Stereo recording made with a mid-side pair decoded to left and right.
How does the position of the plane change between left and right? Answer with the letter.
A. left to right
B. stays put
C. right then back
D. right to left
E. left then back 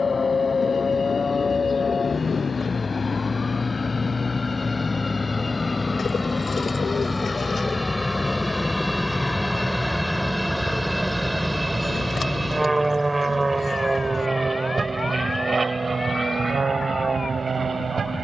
A.